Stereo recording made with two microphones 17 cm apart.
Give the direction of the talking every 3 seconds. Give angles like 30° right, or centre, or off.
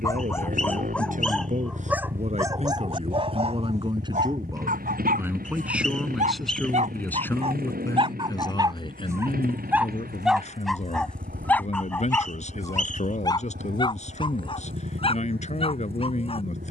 50° right, 20° right, 10° left, 40° left, 40° left, 40° left.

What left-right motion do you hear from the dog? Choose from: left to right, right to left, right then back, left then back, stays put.
right then back.